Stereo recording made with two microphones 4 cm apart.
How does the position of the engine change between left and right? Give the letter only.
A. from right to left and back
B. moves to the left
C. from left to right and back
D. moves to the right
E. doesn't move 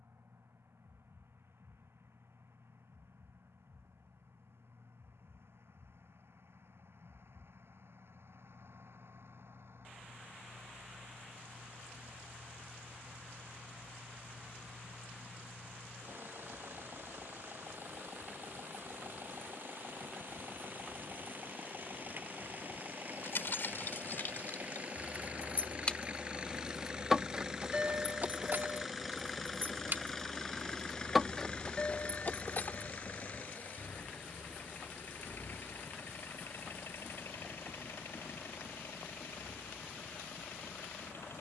B.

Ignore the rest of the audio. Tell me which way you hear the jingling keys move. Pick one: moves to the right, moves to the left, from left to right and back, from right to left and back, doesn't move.
from left to right and back.